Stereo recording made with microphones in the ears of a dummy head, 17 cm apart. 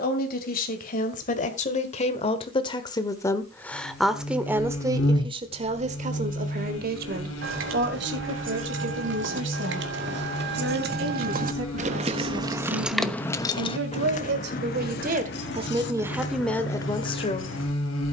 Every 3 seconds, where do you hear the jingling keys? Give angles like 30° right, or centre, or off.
off, off, 70° right, 60° right, 20° left, 70° left.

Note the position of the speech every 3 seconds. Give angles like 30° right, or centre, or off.
40° left, 10° right, 60° right, 70° right, 70° right, centre.